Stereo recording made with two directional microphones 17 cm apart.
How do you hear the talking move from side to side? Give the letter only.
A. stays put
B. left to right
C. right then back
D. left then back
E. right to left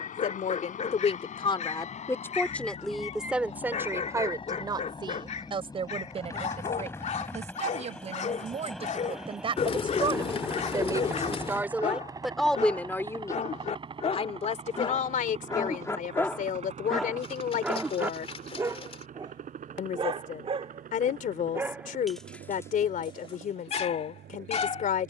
C.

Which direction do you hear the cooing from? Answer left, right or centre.
left.